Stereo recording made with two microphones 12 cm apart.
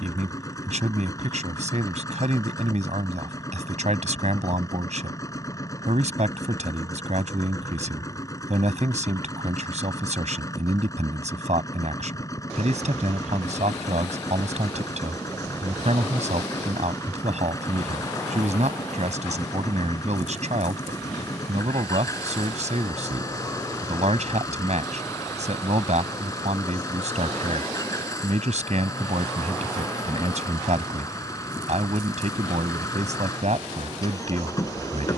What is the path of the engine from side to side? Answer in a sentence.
In this clip you hear the engine stay in one place.